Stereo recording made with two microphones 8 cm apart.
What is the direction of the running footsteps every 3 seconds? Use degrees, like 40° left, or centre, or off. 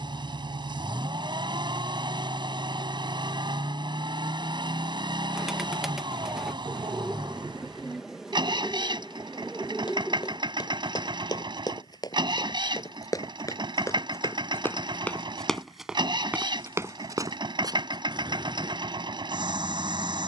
off, off, off, 60° left, 40° left, 20° right, 60° right.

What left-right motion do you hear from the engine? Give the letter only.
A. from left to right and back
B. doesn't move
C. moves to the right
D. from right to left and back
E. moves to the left
B.